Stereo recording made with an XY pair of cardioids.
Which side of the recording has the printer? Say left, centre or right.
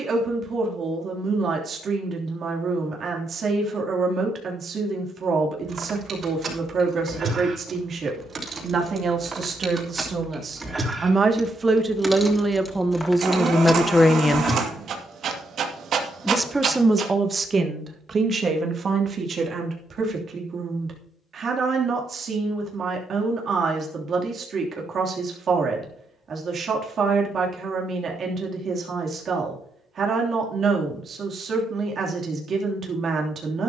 right.